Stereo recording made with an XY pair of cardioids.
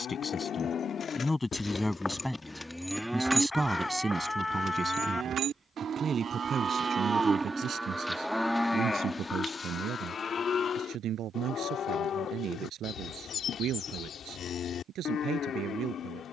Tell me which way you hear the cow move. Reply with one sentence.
You can hear the cow move from left to right and back again.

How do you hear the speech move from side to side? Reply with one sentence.
In this clip you hear the speech move from left to right.